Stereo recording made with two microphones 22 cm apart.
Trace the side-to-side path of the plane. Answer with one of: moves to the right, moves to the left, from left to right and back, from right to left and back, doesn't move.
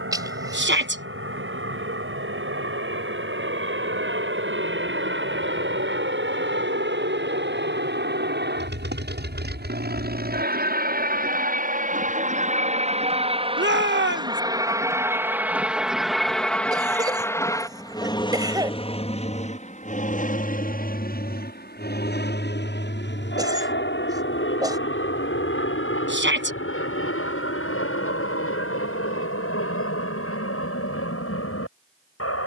moves to the left.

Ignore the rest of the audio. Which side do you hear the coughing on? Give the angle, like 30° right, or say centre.
20° right.